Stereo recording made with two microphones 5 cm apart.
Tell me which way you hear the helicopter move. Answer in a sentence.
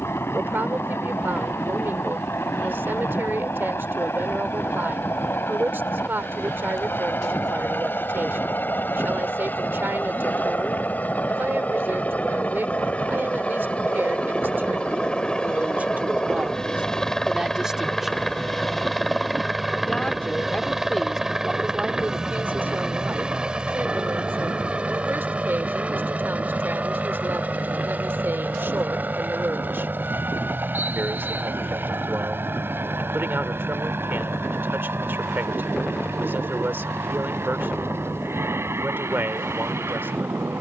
In this clip you hear the helicopter move from left to right.